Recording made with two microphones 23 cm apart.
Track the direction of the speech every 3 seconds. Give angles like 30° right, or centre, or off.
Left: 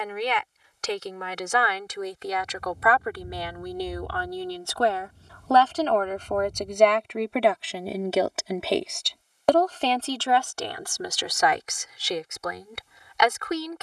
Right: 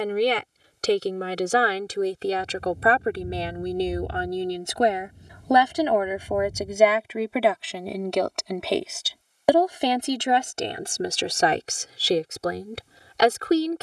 30° right, 20° right, centre, 20° right, 30° right.